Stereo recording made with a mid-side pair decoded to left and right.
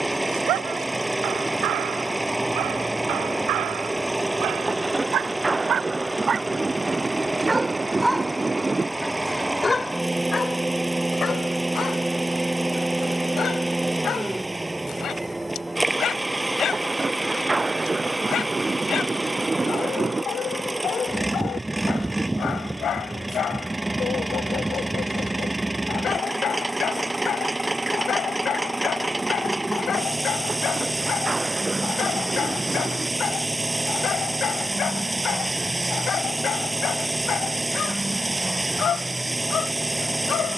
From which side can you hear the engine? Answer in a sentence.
In this clip you hear the engine in the centre.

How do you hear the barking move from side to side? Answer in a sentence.
You can hear the barking move to the left.